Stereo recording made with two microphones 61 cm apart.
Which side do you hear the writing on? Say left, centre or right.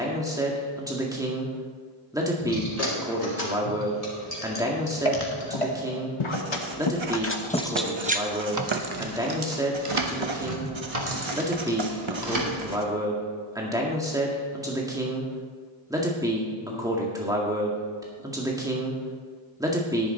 right.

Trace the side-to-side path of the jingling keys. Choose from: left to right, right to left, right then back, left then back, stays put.
left to right.